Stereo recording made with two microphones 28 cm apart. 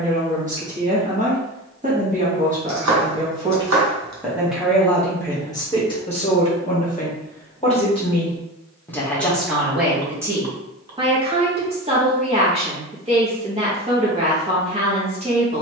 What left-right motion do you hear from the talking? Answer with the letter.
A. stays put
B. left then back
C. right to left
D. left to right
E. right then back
B.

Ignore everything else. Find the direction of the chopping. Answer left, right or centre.
right.